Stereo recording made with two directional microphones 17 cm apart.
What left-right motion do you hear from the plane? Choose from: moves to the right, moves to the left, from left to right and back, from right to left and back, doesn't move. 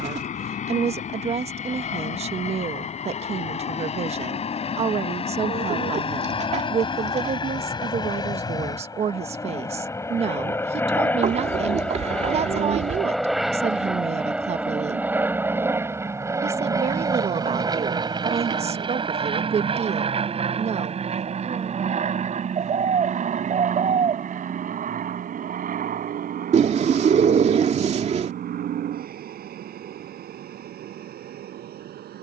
moves to the right.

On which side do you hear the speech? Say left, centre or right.
right.